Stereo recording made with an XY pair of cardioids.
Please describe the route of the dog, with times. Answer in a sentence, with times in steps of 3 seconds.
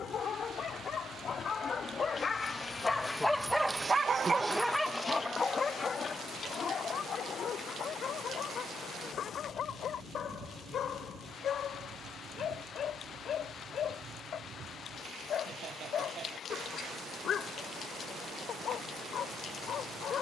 You can hear the dog on the left from 0 s, in the centre from 3 s and on the left from 6 s.